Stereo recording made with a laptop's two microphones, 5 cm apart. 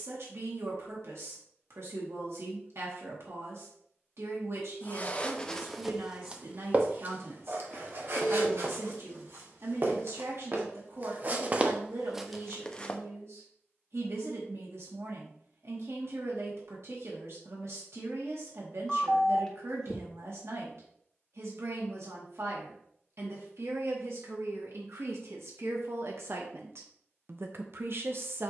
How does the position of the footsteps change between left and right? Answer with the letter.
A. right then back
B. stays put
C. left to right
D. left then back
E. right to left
A.